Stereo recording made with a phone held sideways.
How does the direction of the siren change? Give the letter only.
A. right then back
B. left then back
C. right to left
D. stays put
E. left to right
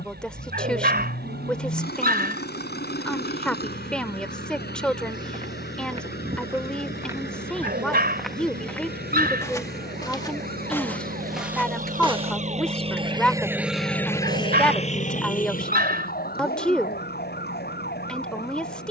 C.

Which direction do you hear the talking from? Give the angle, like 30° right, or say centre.
centre.